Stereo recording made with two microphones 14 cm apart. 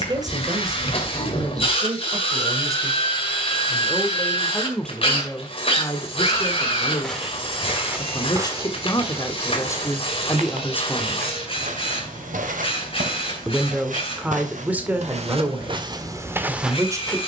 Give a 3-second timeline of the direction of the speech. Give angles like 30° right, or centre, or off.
30° right, centre, 30° left, 20° left, 10° right, 20° right.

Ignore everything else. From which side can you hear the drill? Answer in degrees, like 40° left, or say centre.
40° left.